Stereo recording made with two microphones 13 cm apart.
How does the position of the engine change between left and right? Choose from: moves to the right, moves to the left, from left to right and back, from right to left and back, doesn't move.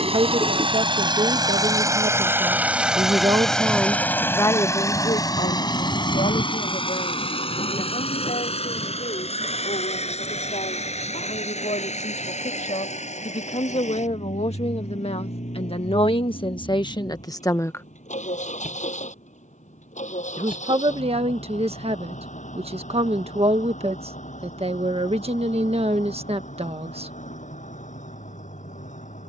moves to the left.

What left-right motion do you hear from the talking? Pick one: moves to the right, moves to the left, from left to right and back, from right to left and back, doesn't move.
from right to left and back.